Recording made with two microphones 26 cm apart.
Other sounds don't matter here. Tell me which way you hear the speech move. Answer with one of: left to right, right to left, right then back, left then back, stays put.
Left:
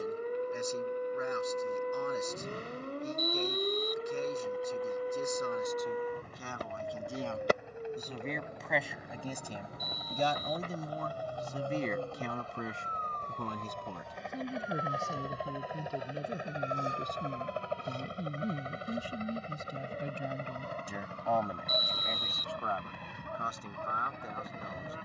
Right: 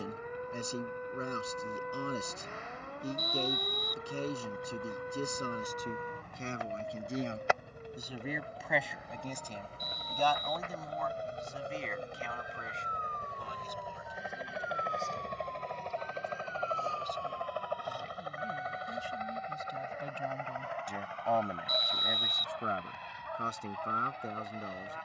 left then back.